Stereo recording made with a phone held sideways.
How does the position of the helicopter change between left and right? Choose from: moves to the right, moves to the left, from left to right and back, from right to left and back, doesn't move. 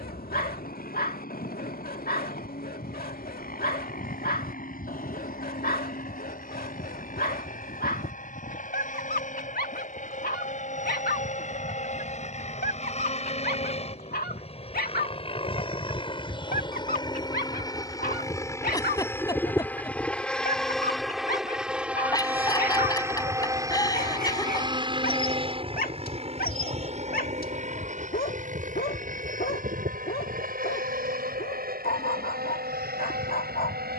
moves to the right.